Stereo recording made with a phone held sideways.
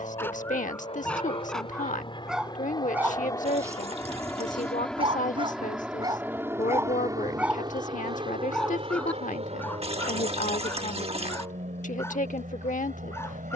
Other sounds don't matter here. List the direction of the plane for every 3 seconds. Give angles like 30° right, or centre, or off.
40° left, 10° left, 30° right, 50° right, 60° right.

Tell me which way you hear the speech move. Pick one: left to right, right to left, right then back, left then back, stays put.
stays put.